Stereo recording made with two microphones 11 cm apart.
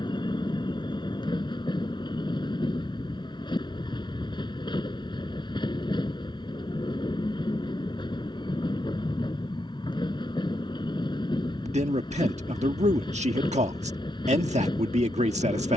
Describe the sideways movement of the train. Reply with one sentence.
You can hear the train stay put.